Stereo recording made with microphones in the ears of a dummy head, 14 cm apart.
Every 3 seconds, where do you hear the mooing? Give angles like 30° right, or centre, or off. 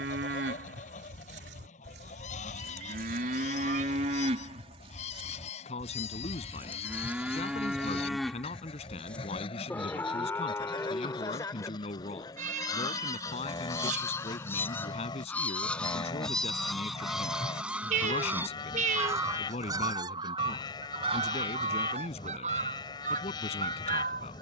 70° right, 40° right, 10° right, 20° left, 30° left, 30° left, 30° left, 30° left.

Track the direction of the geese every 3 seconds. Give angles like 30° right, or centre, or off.
50° left, 40° left, 40° left, 30° left, 20° left, centre, 20° right, 40° right.